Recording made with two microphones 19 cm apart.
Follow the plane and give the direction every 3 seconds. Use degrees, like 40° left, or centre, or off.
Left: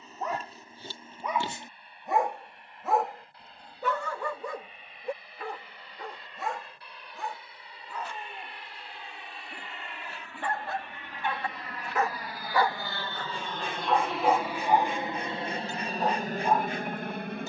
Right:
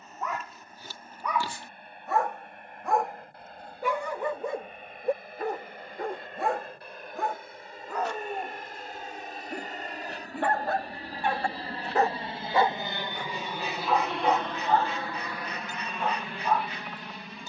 60° right, 60° right, 50° right, 40° right, 10° right, 40° left.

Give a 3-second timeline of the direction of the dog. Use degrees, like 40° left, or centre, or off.
20° left, 20° right, 70° right, 60° right, centre, 30° left.